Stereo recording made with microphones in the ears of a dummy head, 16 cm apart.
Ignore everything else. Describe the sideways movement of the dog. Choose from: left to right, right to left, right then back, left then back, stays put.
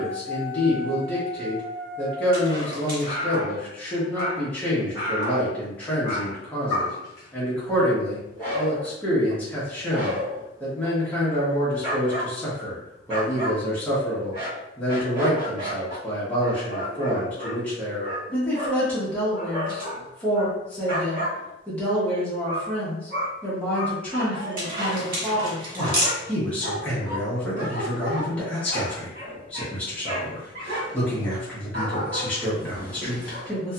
left to right.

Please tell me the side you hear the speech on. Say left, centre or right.
centre.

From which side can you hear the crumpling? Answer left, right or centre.
right.